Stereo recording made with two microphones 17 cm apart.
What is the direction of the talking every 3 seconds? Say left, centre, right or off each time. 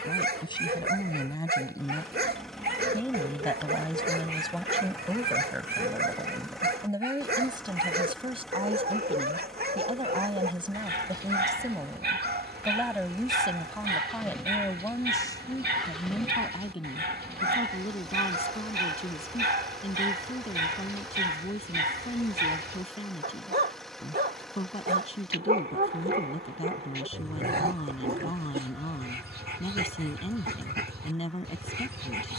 left, centre, right, right, centre, left, left, left, left, left, left.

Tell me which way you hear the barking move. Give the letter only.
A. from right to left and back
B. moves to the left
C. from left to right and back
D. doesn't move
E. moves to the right
D.